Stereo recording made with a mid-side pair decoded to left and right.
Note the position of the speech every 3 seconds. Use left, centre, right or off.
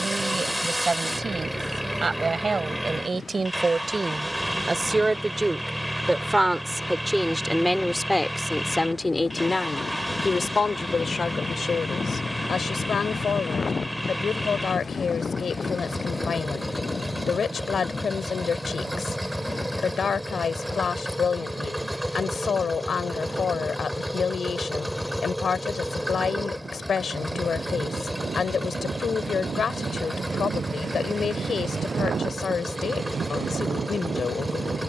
right, right, centre, left, left, left, left, left, left, left, left, left.